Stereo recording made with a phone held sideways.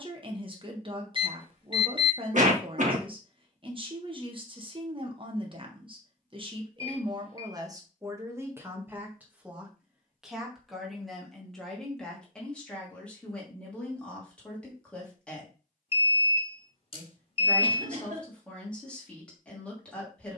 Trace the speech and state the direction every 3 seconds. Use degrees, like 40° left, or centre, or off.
40° right, 40° right, 30° right, centre, 10° left, 10° left, 10° left.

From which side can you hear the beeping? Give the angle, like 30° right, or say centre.
40° left.